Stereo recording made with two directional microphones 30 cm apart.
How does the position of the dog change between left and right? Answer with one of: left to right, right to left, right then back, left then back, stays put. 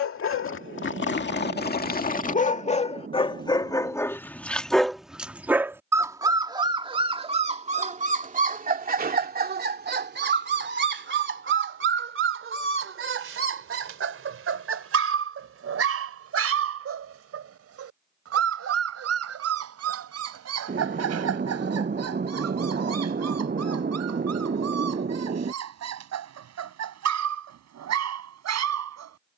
left to right.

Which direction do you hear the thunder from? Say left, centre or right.
right.